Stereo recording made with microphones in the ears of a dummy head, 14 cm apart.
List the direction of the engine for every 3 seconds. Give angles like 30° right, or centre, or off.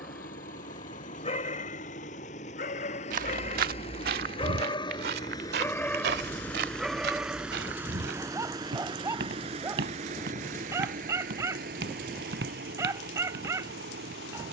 50° left, 30° left, 10° right, 50° right, 70° right.